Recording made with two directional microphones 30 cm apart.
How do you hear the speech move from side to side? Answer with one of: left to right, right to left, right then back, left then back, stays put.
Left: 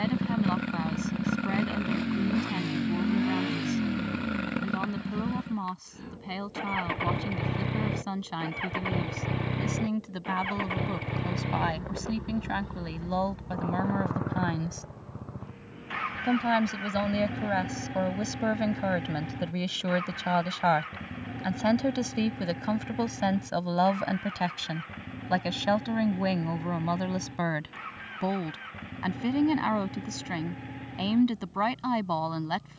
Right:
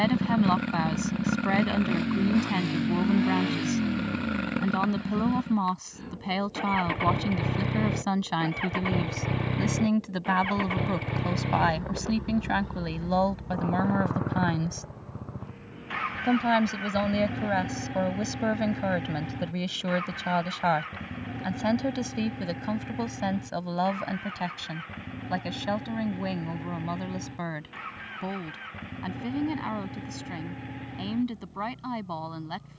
right to left.